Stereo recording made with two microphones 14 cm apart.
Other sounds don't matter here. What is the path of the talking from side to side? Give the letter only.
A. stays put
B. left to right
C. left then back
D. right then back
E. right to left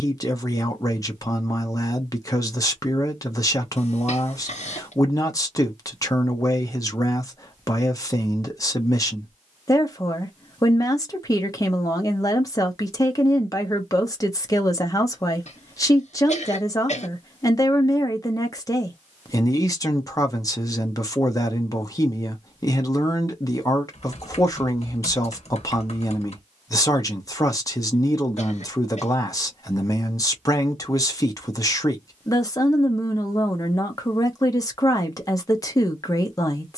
A.